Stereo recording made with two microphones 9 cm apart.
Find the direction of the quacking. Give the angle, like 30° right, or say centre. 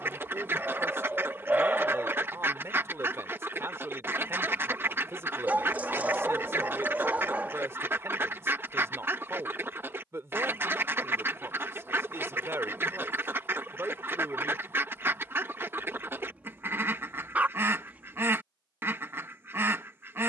30° right.